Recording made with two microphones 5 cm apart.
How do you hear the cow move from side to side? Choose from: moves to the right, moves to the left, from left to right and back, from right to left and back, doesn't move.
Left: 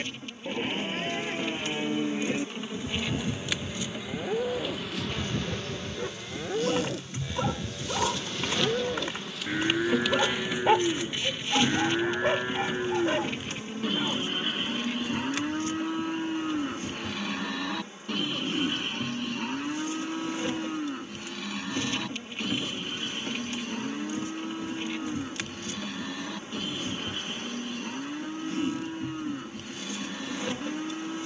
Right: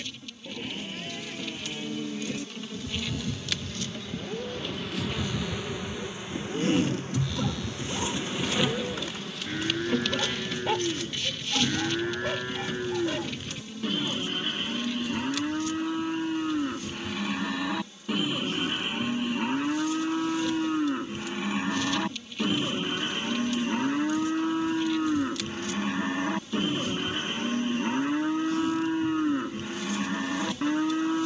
moves to the right.